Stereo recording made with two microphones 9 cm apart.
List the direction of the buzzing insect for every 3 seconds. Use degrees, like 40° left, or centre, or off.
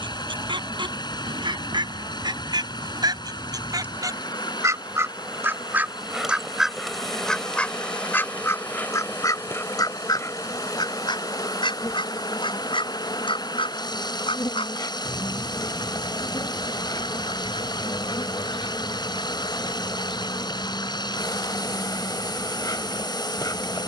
20° right, 10° right, 10° left, 30° left, 50° left, 50° left, 50° left, 50° left.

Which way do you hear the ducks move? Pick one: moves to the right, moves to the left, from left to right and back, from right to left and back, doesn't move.
moves to the left.